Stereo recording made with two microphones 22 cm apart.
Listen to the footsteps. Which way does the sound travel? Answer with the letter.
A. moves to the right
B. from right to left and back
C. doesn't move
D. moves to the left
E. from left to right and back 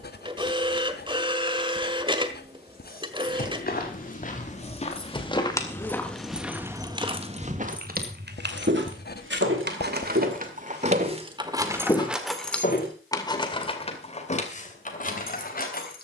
E.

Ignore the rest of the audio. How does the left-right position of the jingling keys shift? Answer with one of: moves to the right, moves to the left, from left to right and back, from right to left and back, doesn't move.
from left to right and back.